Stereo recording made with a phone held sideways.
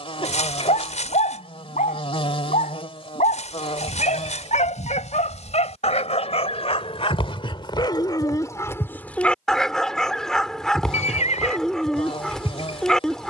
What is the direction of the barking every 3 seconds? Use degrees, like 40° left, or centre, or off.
70° left, 70° left, 40° left, centre, centre.